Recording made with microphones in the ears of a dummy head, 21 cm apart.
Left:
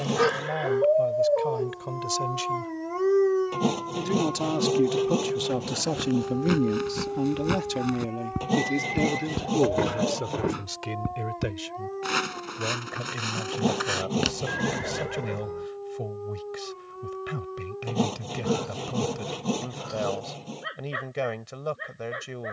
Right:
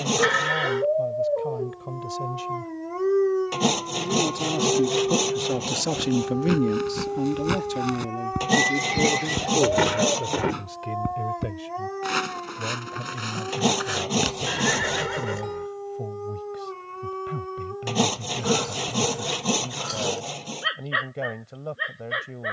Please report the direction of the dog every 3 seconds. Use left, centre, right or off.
left, centre, right, right, right, right, right, right.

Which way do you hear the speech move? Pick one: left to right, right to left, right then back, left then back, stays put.
right then back.